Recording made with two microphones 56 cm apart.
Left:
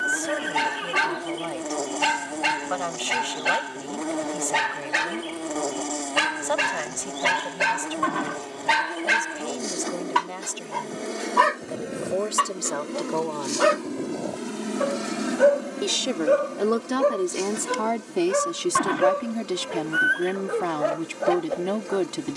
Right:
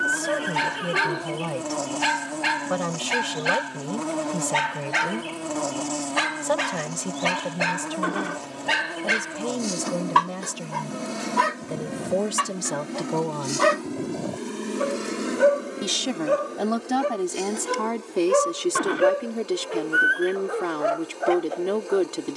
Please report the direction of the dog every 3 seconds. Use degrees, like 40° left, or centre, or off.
70° left, 60° left, 40° left, centre, 20° right, 20° right, 40° left, 60° left.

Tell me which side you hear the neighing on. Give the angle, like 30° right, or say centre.
20° left.